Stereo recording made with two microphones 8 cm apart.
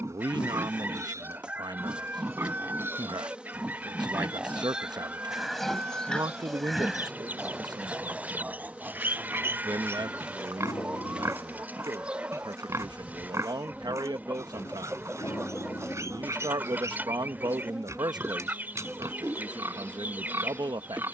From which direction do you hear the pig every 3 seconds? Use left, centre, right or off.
right, centre, centre, right, right, right, right.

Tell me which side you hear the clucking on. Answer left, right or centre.
right.